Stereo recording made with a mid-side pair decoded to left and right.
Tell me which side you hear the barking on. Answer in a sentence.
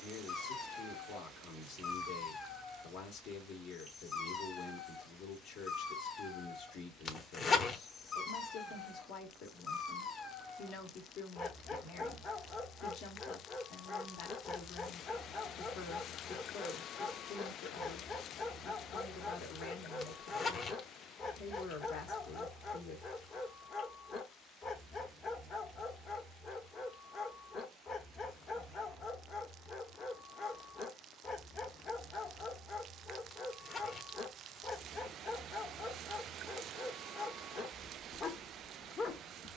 You can hear the barking on the left.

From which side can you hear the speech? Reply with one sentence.
In this clip you hear the speech on the left.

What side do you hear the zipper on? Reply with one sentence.
You can hear the zipper on the left.